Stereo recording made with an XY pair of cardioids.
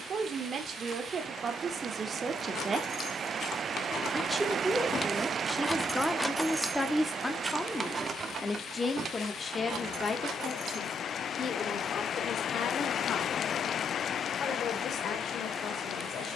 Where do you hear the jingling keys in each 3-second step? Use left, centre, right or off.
left, left, right, right, off, off.